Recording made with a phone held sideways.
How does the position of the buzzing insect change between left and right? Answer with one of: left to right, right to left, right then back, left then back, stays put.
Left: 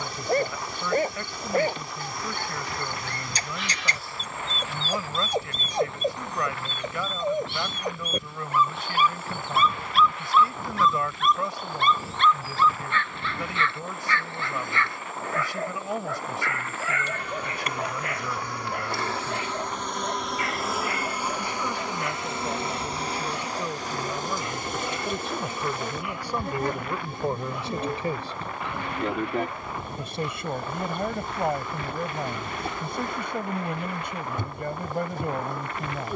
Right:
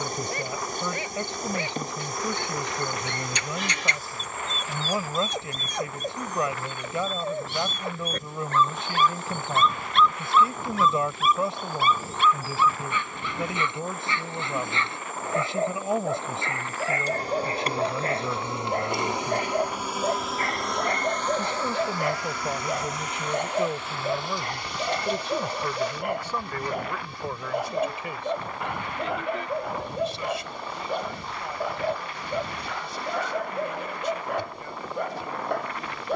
right to left.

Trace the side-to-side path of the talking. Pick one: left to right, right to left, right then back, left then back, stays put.
right to left.